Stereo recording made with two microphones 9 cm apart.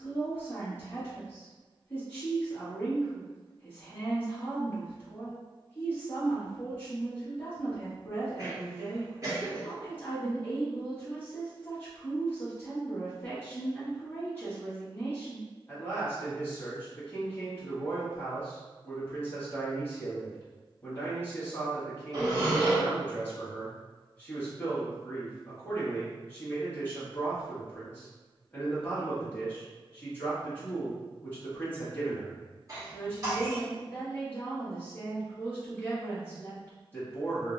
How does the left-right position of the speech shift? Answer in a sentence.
You can hear the speech stay in one place.